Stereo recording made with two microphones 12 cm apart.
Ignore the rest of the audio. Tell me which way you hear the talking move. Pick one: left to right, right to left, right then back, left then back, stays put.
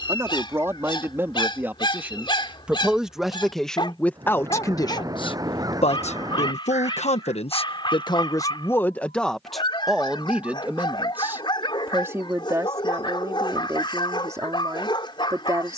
left then back.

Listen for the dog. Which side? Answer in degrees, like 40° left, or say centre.
40° left.